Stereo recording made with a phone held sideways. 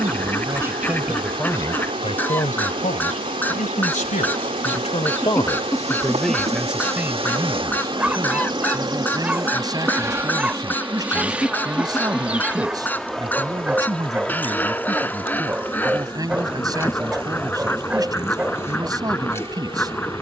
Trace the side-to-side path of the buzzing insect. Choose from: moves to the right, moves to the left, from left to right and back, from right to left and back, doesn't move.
moves to the left.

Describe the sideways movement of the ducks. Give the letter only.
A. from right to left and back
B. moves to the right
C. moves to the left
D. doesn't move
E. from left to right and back
D.